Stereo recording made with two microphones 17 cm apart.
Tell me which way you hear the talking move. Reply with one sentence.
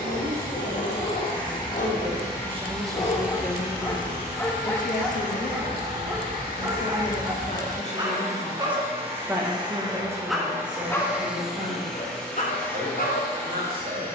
You can hear the talking go left and come back.